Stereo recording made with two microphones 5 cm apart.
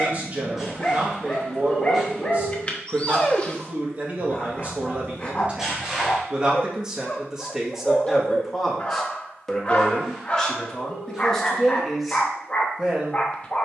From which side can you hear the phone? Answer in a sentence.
You can hear the phone in the centre.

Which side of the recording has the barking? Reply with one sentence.
In this clip you hear the barking on the left.